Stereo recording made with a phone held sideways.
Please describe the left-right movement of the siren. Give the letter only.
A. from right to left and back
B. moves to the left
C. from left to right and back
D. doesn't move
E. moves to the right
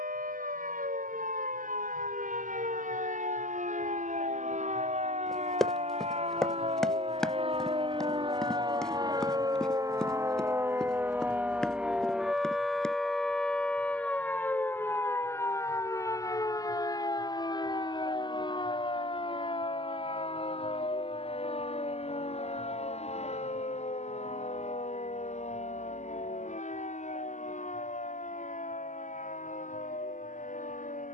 B.